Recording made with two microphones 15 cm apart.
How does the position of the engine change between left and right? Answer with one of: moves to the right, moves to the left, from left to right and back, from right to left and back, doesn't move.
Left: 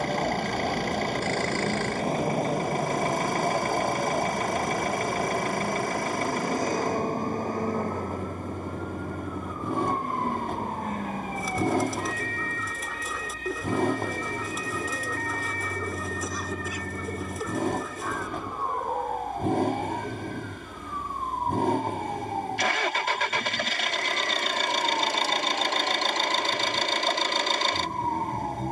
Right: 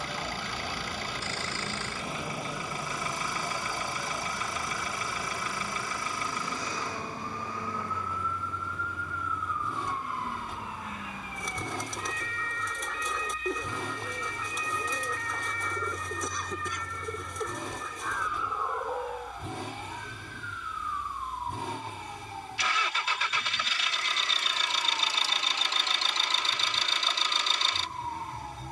doesn't move.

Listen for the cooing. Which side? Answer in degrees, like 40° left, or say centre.
centre.